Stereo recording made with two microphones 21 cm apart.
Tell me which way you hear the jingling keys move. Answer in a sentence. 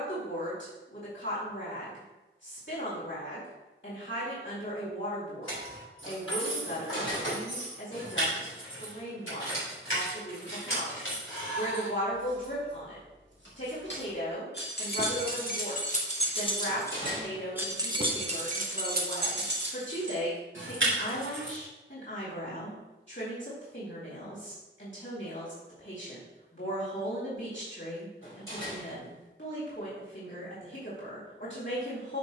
In this clip you hear the jingling keys travel towards the right.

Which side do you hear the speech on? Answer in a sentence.
You can hear the speech on the left.